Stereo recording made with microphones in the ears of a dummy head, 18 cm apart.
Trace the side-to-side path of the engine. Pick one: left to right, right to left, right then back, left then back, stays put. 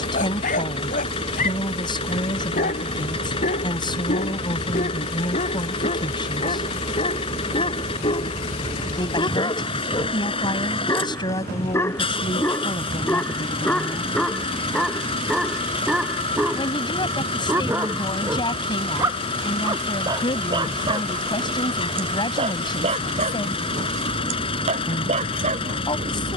stays put.